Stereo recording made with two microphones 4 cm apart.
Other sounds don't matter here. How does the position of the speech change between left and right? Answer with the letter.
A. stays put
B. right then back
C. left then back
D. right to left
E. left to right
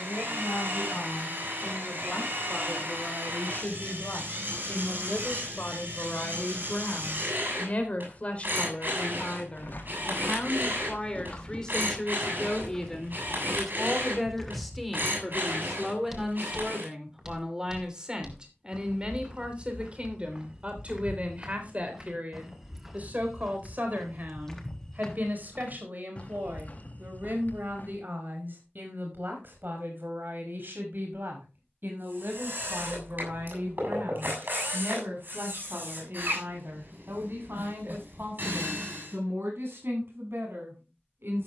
E.